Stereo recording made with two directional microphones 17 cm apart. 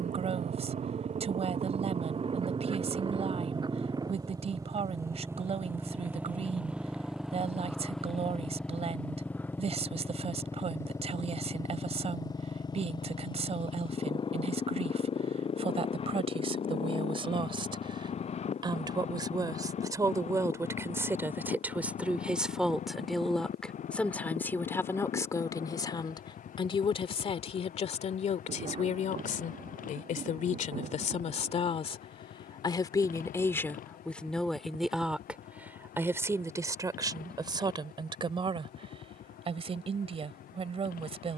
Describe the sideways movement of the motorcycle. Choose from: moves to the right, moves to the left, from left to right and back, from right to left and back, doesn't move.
moves to the left.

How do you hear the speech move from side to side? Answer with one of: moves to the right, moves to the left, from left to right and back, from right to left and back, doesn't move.
from right to left and back.